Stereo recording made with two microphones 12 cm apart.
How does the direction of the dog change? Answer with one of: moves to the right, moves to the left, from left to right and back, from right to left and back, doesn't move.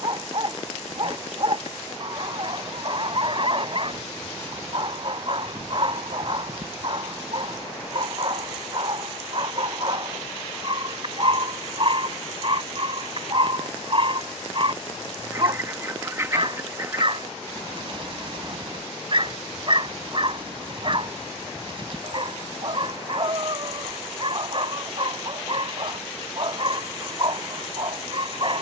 doesn't move.